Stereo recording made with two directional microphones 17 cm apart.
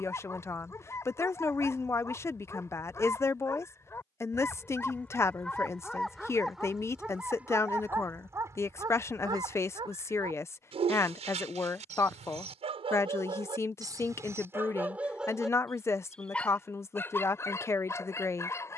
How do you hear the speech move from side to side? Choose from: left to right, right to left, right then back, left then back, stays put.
stays put.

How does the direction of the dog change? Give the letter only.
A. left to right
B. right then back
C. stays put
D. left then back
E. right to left
B.